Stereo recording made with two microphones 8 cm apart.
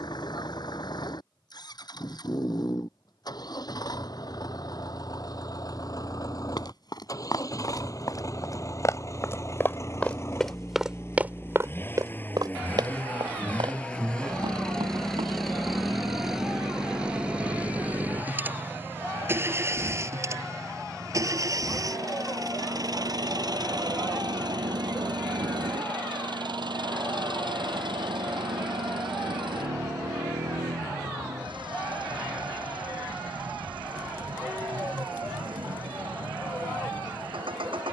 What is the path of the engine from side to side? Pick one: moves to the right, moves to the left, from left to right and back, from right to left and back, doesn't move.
moves to the right.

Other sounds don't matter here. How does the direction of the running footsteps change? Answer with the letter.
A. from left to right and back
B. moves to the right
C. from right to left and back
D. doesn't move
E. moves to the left
B.